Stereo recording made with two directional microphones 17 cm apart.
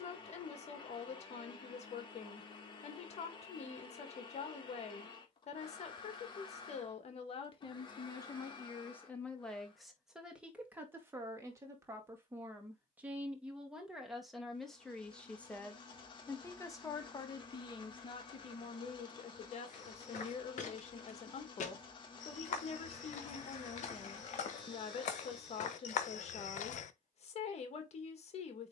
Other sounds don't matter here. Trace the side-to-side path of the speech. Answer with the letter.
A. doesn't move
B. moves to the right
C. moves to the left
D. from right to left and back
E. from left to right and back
E.